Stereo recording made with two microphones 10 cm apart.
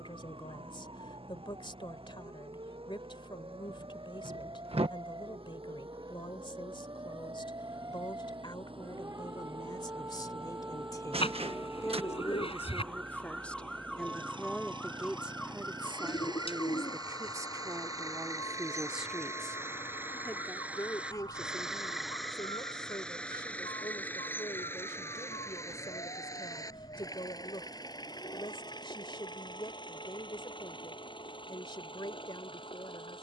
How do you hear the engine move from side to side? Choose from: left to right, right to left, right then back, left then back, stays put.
right to left.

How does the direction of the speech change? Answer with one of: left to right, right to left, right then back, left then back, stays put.
right then back.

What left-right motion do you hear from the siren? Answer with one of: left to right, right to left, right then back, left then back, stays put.
right to left.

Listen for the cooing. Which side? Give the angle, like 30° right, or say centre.
70° left.